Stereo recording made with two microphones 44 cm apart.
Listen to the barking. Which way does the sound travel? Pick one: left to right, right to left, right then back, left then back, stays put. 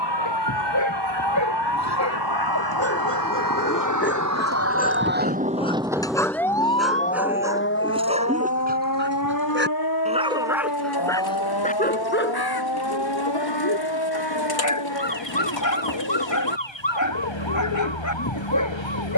right then back.